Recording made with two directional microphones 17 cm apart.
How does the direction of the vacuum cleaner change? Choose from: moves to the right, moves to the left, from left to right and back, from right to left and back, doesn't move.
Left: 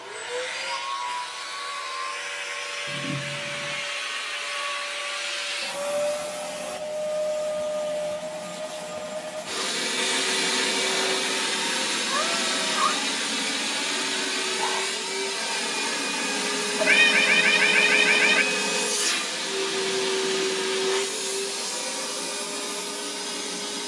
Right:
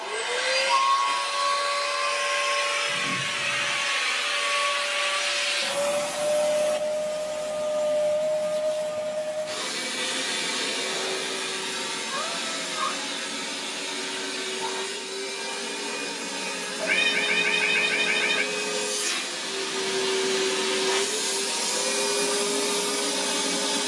from right to left and back.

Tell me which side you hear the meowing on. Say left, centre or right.
left.